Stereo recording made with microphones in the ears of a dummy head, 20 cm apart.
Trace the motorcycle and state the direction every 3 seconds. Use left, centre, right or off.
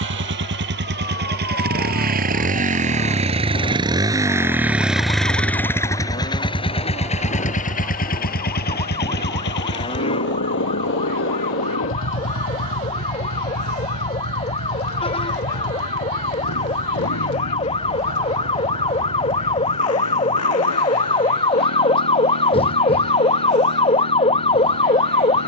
right, centre, left, left, left, left, left, left, left.